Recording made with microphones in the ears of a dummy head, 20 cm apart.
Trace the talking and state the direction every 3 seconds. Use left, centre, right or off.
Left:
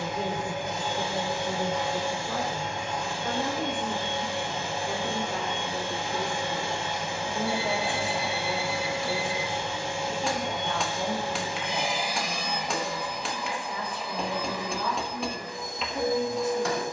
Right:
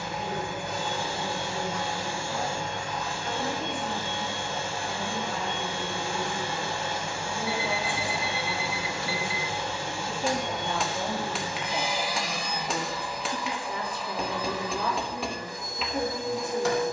left, left, left, centre, right, right.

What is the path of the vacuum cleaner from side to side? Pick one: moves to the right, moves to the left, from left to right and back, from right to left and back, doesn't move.
doesn't move.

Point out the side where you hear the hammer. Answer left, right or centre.
centre.